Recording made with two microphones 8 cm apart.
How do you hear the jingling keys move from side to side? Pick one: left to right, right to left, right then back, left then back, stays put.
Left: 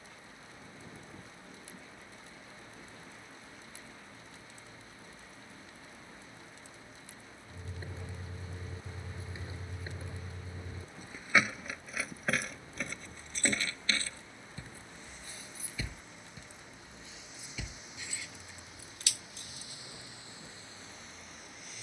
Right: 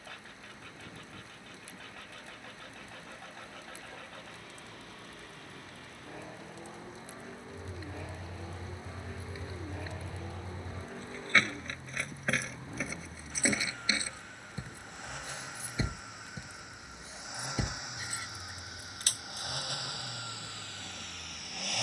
left to right.